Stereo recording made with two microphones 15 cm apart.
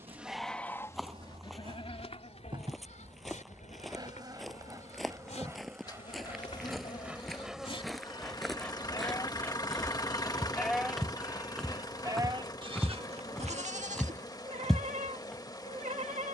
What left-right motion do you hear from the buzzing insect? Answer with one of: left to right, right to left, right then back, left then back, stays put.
right to left.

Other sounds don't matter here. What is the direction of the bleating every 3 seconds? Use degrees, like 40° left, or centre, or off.
30° left, 50° left, 40° left, 10° left, 40° right, 50° right.